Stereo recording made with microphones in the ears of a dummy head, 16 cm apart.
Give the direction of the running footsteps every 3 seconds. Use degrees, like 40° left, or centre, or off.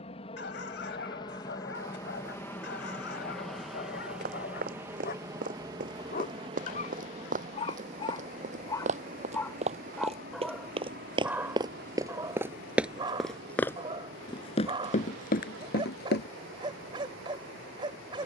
off, 50° right, 50° right, 30° right, 10° left, 60° left.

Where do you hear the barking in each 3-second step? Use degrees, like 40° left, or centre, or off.
70° left, 60° left, 30° left, centre, 20° right, 30° right.